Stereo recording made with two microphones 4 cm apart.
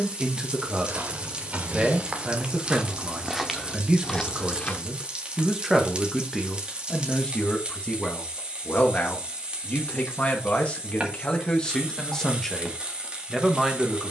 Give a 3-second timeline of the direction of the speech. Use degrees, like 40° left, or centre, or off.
20° right, 10° right, 20° left, 30° left, centre.